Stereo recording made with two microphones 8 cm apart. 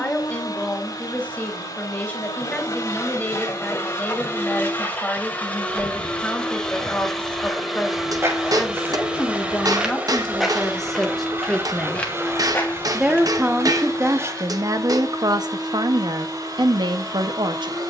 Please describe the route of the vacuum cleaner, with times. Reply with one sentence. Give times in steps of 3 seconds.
You can hear the vacuum cleaner on the left from 0 s, in the centre from 6 s and on the right from 9 s.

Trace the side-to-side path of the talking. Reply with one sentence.
In this clip you hear the talking go from the left side to the right.